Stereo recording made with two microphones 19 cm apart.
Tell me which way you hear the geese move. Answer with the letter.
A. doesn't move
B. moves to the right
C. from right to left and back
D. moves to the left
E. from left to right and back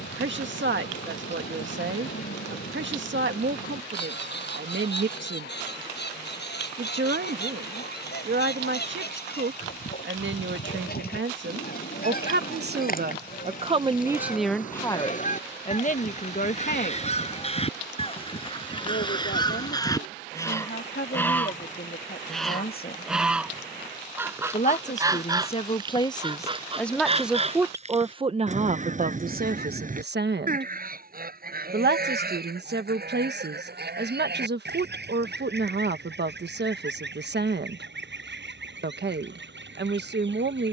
B.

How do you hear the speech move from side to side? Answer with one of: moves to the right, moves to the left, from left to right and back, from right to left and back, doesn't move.
from right to left and back.